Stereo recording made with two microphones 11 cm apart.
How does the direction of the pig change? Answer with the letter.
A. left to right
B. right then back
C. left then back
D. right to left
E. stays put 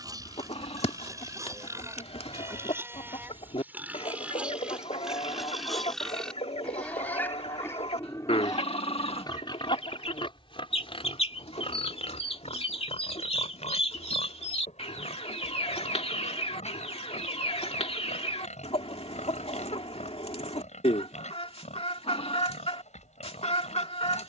D.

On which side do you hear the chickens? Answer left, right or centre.
left.